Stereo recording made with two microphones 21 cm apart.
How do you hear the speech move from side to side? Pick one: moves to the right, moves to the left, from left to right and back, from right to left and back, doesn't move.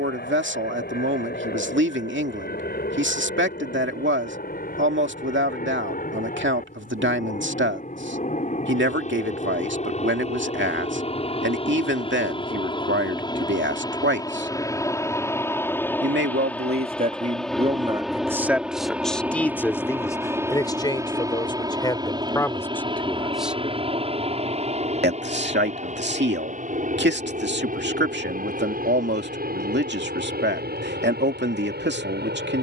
from right to left and back.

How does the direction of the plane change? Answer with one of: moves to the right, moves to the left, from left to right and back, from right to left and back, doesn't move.
moves to the right.